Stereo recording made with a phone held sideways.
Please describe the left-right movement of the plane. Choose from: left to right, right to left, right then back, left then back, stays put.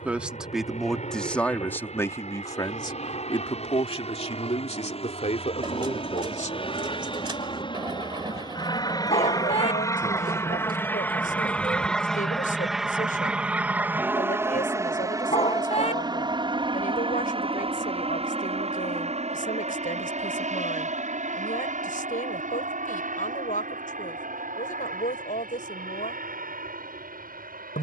left to right.